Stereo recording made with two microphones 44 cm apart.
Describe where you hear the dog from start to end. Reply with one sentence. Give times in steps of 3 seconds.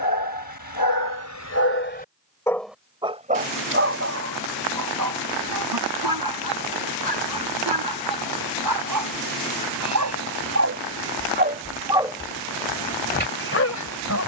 You can hear the dog on the left from 0 s, on the right from 3 s and on the left from 12 s.